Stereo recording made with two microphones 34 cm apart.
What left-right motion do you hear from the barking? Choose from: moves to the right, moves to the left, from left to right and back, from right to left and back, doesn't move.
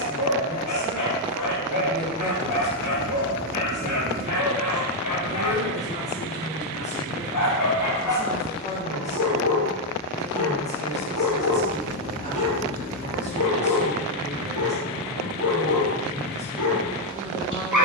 doesn't move.